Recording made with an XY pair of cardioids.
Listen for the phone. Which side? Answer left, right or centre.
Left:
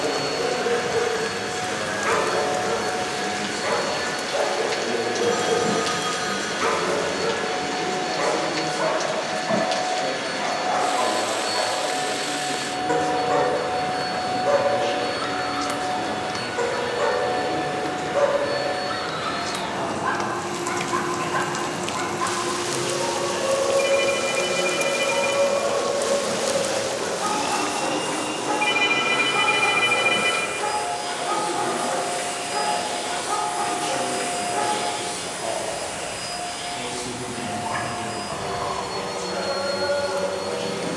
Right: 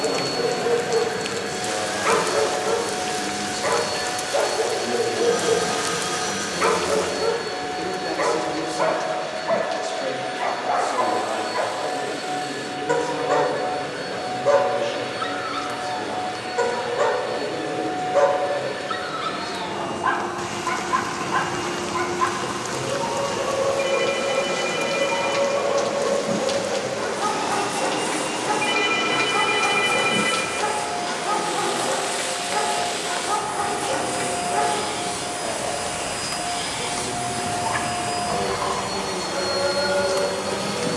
left.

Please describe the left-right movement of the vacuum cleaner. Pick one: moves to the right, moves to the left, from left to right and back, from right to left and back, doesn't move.
moves to the right.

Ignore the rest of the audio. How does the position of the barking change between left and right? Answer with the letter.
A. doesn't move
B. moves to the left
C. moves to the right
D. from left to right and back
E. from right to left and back
A.